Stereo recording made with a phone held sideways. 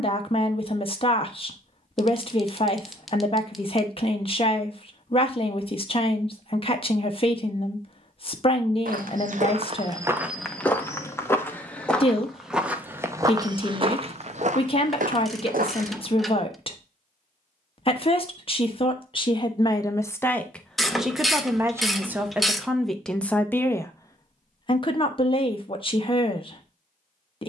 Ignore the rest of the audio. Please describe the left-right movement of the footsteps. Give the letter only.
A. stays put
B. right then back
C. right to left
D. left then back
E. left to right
D.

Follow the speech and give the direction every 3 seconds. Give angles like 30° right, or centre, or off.
40° left, 40° left, 40° left, 40° left, 40° left, 40° left, 30° left, centre, 40° left.